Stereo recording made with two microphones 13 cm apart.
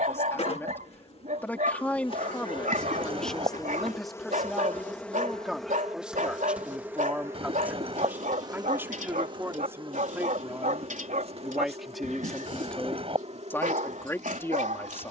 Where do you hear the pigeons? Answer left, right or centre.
right.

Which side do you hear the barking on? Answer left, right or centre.
right.